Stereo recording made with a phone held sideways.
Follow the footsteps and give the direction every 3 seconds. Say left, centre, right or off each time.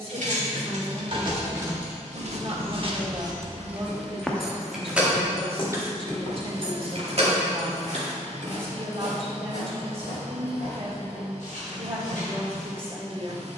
right, centre, left, left, left.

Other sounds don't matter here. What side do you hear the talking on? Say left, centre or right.
right.